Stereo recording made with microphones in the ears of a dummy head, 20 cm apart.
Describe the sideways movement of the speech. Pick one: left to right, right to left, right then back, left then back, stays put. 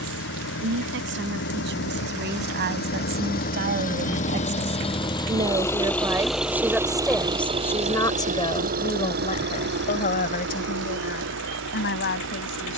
right to left.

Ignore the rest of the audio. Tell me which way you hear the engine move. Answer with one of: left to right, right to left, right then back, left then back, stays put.
left to right.